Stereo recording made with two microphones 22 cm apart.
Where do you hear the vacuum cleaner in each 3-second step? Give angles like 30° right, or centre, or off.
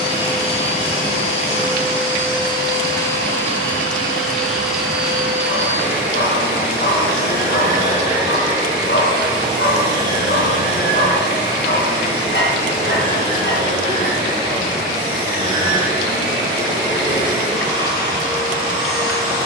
30° left, centre, 20° right, 20° right, 20° right, 20° right, 20° right.